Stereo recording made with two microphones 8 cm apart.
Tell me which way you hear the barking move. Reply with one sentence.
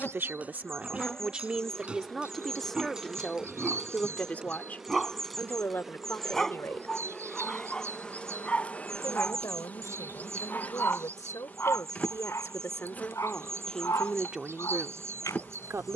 In this clip you hear the barking move from right to left.